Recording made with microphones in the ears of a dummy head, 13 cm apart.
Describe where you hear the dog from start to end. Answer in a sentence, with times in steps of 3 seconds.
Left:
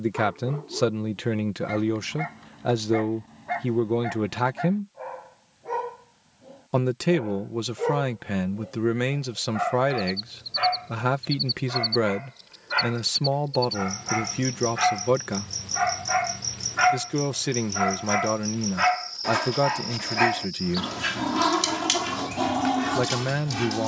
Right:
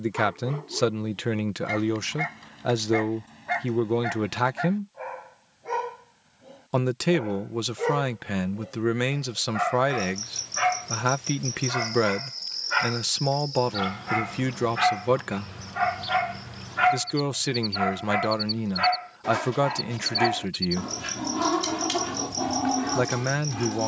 You can hear the dog on the right from 0 s, in the centre from 15 s and on the left from 18 s.